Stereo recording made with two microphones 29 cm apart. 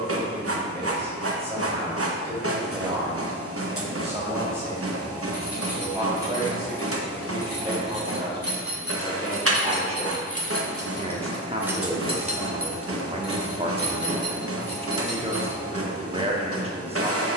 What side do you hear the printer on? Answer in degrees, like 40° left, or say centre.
50° right.